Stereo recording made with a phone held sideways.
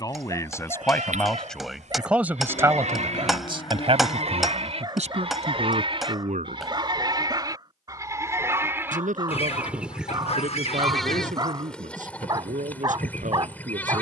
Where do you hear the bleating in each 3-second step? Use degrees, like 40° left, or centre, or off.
70° right, 50° right, 30° right, centre, 10° left.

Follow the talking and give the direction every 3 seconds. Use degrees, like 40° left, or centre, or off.
centre, 50° right, 70° right, 80° right, 80° right.